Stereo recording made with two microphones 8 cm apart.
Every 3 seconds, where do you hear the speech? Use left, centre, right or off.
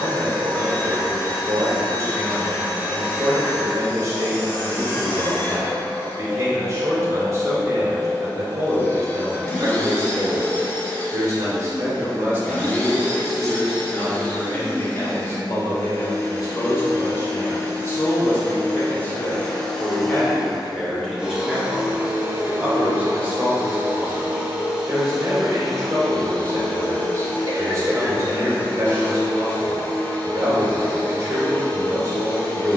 right, right, right, right, centre, left, left, centre, right, right, right.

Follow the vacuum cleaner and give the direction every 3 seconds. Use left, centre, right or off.
left, left, left, left, left, left, centre, right, centre, left, left.